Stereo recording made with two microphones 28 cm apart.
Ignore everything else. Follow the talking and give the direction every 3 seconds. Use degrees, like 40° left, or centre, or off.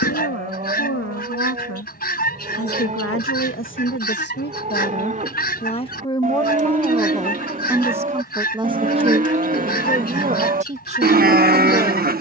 60° left, 40° left, centre, 20° right.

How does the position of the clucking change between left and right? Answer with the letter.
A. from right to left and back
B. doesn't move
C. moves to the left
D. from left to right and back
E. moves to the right
B.